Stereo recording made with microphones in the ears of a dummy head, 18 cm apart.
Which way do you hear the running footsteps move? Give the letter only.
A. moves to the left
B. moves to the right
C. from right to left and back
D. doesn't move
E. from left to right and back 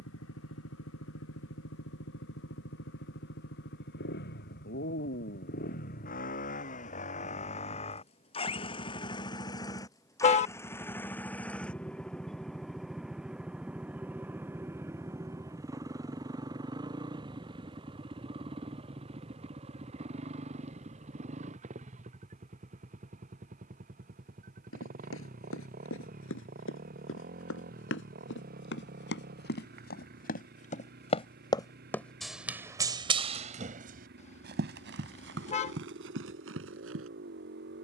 B.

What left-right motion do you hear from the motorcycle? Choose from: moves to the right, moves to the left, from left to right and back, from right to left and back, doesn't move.
moves to the right.